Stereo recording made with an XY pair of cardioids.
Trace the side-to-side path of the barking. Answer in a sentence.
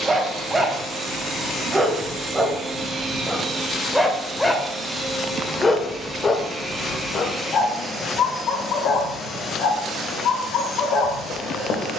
In this clip you hear the barking travel towards the left.